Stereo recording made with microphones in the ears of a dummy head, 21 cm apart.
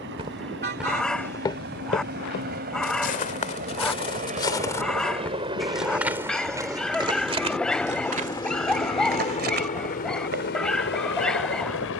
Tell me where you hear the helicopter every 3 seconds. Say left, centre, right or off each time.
right, right, centre, left.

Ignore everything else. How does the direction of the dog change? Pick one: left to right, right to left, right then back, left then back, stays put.
stays put.